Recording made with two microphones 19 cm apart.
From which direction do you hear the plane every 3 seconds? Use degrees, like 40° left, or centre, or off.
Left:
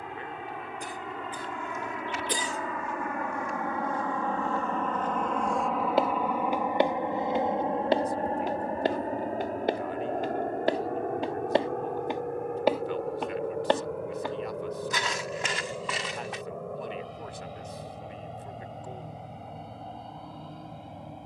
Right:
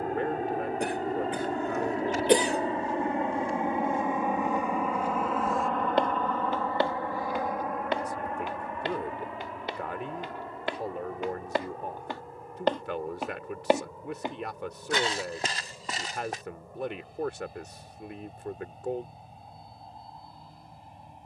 40° right, 10° right, 20° left, 50° left, 60° left, 70° left, 70° left.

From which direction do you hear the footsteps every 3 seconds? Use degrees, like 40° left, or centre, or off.
40° right, 20° right, 30° left, 40° left, 10° right, 40° right, off.